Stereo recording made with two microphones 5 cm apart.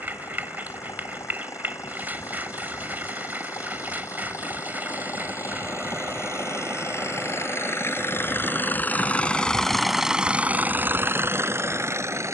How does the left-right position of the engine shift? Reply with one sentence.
You can hear the engine move to the right.